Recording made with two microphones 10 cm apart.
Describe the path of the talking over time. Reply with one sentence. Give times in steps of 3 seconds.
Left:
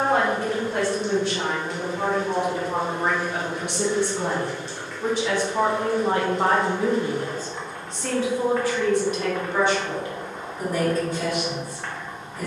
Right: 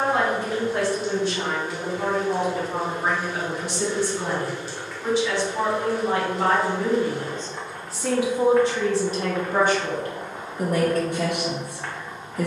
In this clip you hear the talking on the left from 0 s, in the centre from 6 s and on the right from 9 s.